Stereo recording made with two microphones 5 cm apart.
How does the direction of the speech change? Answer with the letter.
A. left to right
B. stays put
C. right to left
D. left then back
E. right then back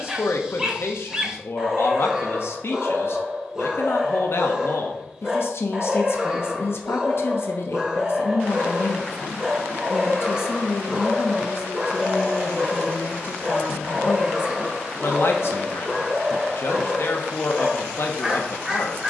B.